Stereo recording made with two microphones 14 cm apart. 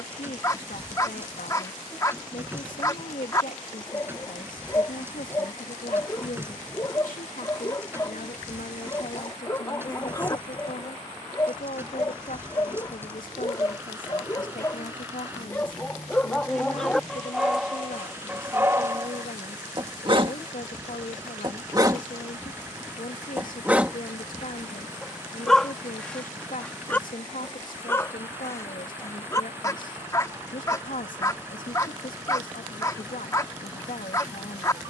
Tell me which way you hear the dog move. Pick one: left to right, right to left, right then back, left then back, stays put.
right then back.